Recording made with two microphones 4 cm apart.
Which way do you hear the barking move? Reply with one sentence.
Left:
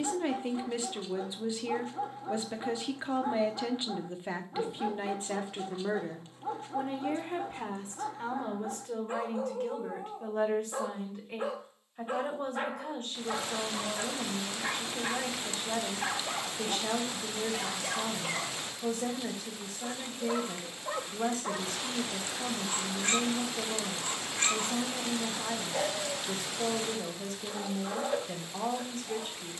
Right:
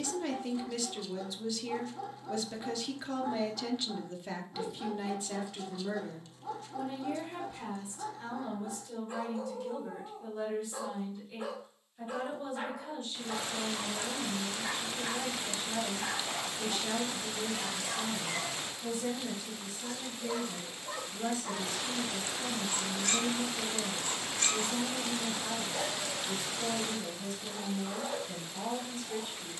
In this clip you hear the barking stay in one place.